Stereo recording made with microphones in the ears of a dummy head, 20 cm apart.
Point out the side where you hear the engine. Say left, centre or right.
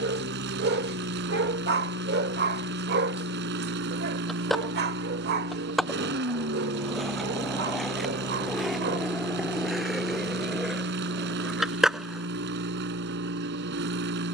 right.